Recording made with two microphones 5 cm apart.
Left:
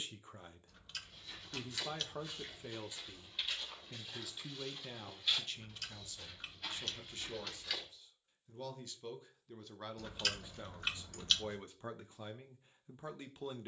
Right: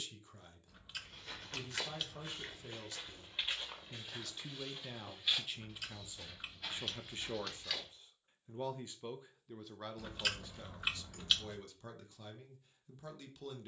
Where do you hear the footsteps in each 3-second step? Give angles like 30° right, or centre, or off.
40° right, 20° right, centre, off, off.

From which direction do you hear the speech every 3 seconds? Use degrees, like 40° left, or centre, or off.
30° left, centre, 30° right, 10° left, 30° left.